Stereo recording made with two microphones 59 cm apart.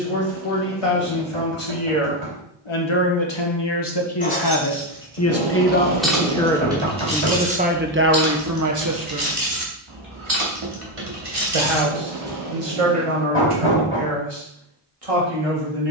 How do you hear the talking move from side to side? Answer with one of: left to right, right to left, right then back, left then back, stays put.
left to right.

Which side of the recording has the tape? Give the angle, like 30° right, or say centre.
70° right.